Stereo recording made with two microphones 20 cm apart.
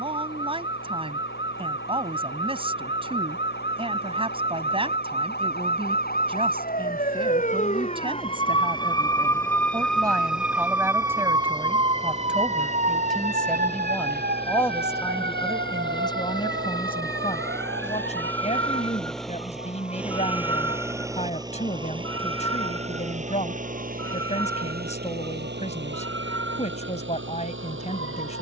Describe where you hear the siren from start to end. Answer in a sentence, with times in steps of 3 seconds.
In this clip you hear the siren on the left from 0 s, in the centre from 9 s and on the right from 12 s.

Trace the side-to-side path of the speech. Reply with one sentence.
You can hear the speech go from the right side to the left.